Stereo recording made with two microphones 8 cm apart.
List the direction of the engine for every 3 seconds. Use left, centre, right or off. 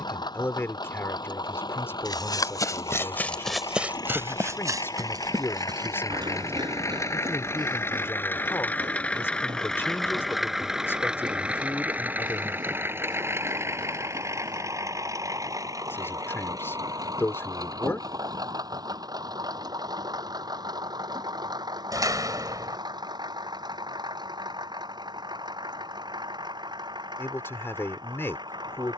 left, left, left, centre, right, right, right, right, right, right.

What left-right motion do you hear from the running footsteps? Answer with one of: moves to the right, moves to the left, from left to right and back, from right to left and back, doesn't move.
moves to the right.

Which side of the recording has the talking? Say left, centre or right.
left.